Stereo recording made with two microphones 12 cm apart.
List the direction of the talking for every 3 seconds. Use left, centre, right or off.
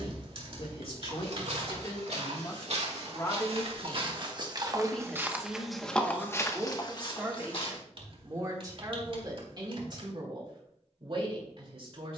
left, centre, right, right.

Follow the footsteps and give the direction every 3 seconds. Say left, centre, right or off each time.
right, right, left, off.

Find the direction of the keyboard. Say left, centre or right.
right.